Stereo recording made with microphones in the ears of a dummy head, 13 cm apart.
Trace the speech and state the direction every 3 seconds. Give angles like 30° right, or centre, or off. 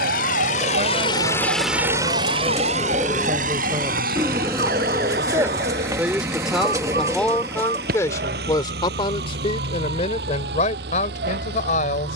50° right, 30° right, 10° left, 50° left.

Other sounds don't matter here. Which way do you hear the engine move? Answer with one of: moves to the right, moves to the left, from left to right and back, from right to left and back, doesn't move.
moves to the right.